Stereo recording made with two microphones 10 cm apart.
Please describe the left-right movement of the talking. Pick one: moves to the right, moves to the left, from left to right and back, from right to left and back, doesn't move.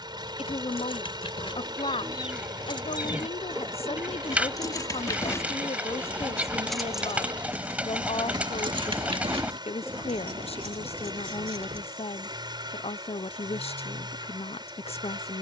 doesn't move.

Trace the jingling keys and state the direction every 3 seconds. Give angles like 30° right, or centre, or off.
50° left, 40° left, 20° right, 70° right, off.